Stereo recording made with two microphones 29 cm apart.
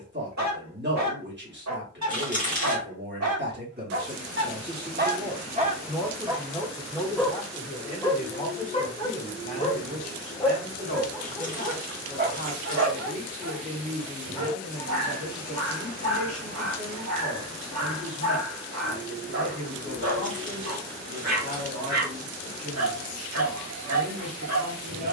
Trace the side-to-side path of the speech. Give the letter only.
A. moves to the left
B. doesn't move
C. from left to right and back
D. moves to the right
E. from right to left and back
A.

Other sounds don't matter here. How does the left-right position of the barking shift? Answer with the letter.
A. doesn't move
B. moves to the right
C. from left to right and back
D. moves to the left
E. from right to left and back
E.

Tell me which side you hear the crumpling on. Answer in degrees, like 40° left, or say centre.
30° left.